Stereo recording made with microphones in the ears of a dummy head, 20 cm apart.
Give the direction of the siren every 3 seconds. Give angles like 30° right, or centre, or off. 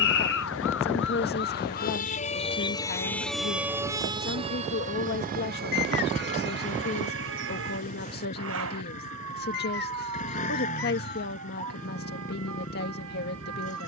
40° left, 20° right, 60° right, 70° right, 70° right.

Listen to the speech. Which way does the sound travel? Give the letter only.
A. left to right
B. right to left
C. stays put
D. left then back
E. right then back
C.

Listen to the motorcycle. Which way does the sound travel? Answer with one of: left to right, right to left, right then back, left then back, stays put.
stays put.